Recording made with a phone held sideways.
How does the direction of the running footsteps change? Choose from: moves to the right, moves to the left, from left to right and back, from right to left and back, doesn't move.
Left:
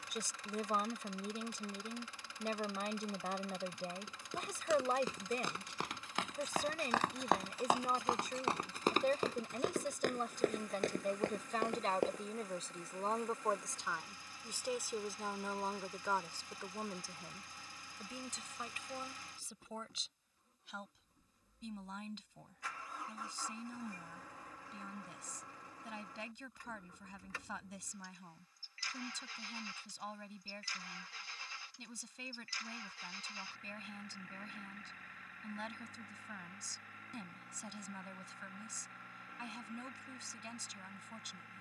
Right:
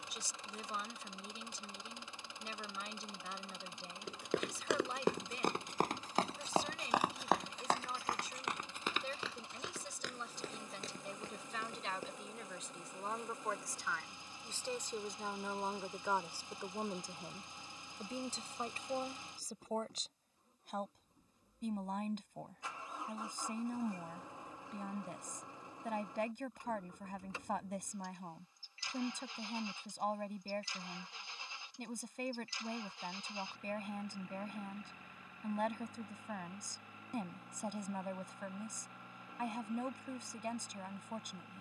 moves to the left.